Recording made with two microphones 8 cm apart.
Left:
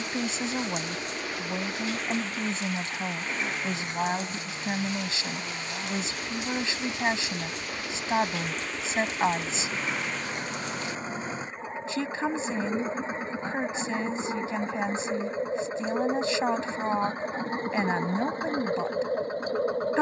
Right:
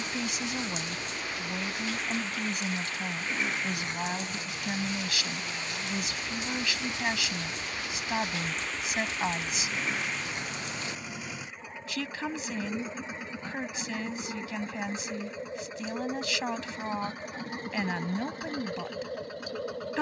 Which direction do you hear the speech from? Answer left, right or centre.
left.